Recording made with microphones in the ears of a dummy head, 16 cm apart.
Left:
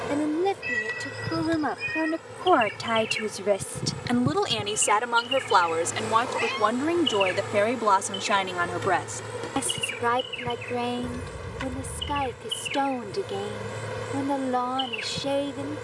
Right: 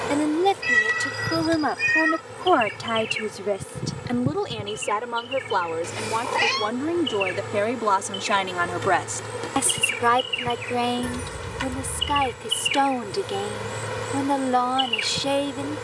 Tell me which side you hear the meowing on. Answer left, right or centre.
right.